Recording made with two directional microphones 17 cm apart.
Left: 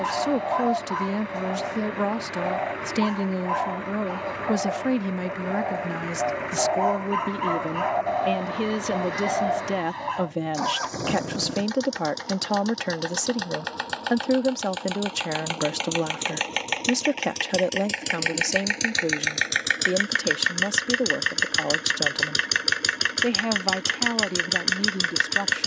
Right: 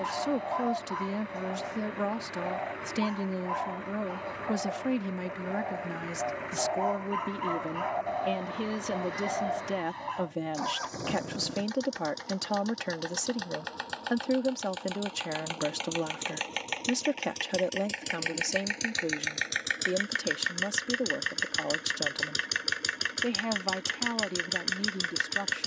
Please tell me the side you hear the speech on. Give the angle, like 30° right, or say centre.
30° left.